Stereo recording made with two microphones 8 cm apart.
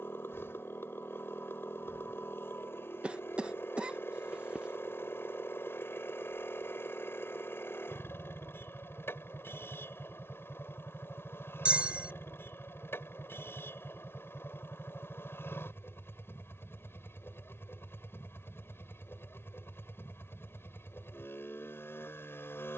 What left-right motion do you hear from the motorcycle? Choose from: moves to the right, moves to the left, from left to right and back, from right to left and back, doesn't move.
doesn't move.